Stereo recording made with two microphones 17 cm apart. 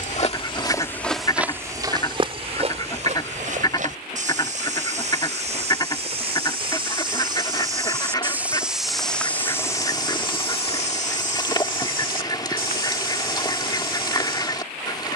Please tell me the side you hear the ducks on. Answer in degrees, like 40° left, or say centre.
30° left.